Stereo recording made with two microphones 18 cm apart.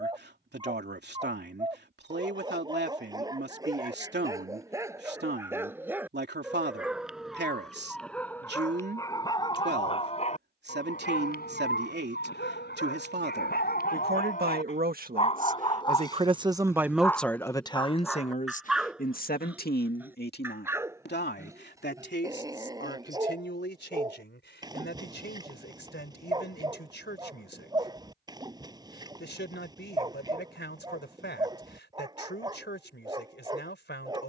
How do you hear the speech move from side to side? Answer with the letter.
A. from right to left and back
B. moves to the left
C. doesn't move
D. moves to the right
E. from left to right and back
B.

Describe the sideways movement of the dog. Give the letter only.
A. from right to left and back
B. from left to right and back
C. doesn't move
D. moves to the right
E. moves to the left
A.